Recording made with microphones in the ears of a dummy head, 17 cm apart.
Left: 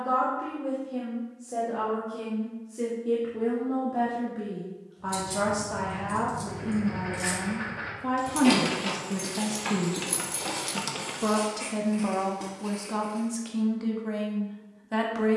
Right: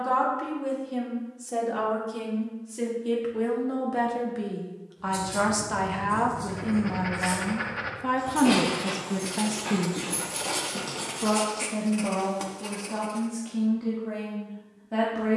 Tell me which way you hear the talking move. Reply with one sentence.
You can hear the talking move from right to left.